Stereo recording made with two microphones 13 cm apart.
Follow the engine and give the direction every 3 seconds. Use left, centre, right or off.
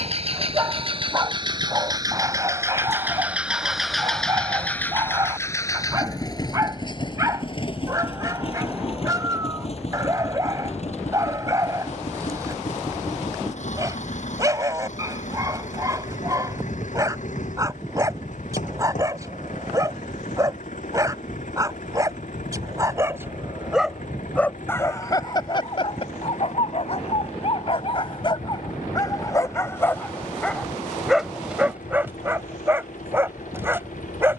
right, centre, left, left, left, left, left, left, left, left, left, left.